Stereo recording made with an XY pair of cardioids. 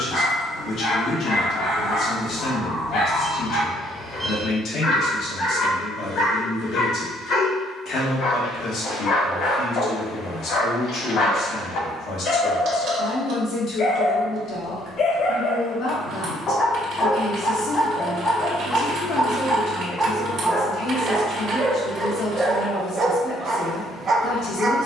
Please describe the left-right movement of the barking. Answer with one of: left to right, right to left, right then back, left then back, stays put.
left to right.